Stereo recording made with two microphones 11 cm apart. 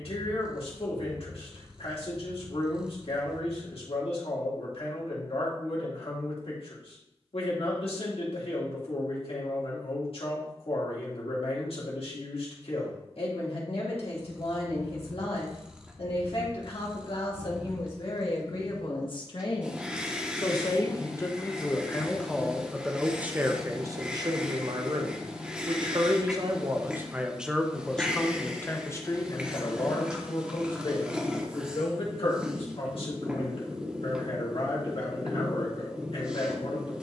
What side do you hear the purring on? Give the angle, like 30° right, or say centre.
10° right.